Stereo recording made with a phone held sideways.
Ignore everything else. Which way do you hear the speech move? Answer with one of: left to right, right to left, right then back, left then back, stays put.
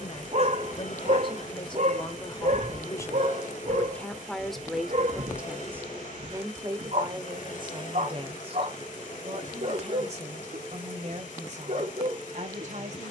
left to right.